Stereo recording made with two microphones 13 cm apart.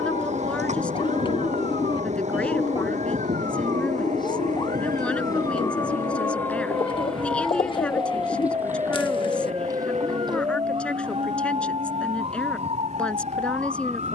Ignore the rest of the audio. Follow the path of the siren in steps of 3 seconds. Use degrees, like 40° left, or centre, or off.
50° left, 30° left, centre, 30° right, 50° right.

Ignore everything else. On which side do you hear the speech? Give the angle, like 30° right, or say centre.
10° left.